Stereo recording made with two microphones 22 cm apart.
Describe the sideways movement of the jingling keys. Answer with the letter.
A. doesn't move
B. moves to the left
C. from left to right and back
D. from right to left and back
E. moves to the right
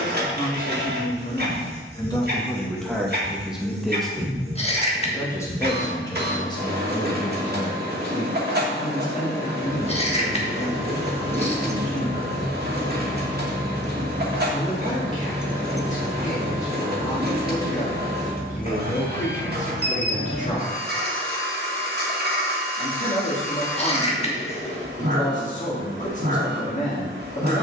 D.